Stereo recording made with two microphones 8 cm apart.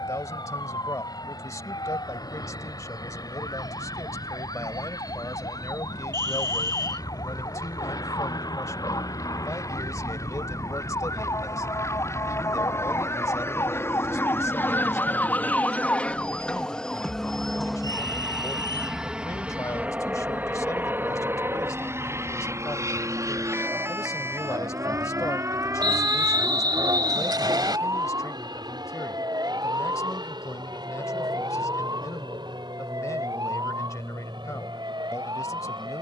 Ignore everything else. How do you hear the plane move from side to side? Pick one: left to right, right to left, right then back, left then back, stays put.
left to right.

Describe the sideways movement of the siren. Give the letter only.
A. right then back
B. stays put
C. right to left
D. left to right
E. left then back
D.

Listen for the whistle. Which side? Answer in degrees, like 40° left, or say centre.
70° right.